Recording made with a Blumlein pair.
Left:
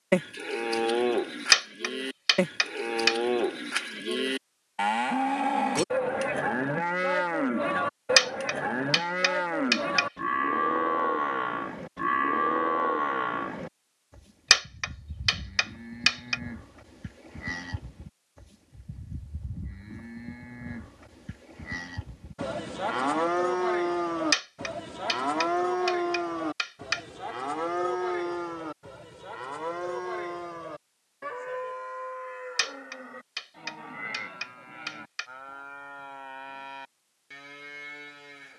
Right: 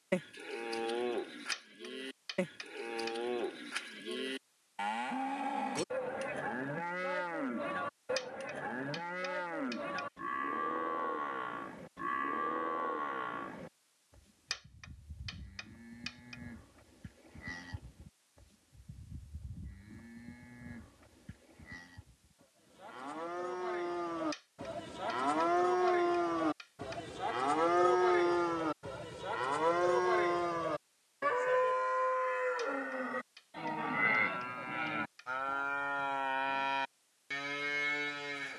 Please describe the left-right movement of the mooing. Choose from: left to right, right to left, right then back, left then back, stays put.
left to right.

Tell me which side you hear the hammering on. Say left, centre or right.
left.